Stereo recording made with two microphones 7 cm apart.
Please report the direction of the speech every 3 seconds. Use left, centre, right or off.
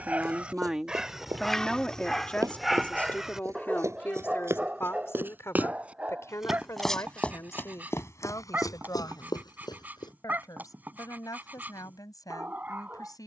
centre, left, left, left, left.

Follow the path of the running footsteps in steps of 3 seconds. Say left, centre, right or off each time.
right, right, left, left, off.